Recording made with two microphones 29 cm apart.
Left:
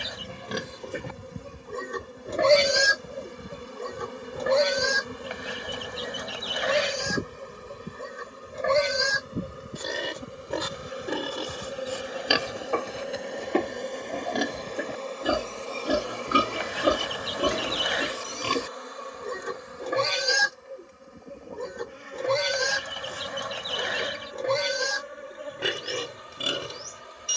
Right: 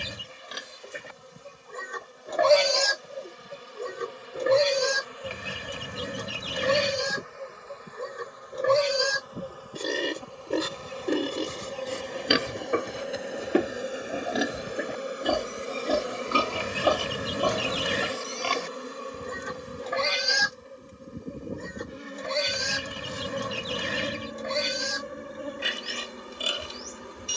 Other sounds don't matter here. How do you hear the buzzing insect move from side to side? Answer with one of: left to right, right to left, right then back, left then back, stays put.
left to right.